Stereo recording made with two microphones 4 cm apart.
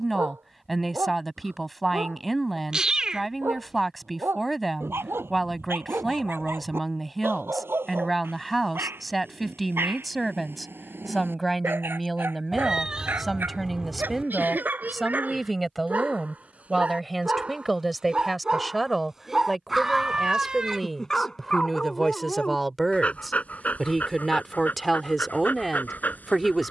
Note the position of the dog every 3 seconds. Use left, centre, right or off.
right, right, right, right, right, right, centre, left, left.